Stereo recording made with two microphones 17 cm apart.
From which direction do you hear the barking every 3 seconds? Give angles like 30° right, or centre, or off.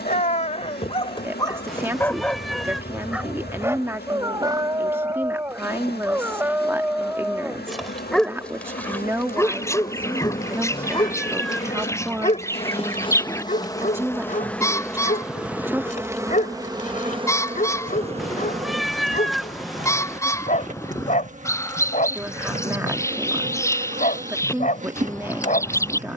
20° left, 20° right, centre, 20° left, 50° left, 50° left, 50° left, 50° left, 50° left.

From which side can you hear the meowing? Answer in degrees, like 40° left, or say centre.
centre.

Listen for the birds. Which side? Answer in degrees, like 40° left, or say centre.
20° left.